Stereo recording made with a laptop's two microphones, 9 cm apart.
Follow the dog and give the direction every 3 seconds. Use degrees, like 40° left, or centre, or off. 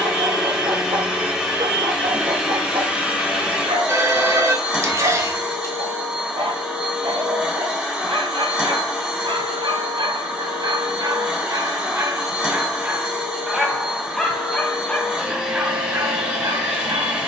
70° right, 70° right, 70° right, 50° right, 10° right, 30° right.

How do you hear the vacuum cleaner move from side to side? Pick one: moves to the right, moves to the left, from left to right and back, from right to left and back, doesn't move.
doesn't move.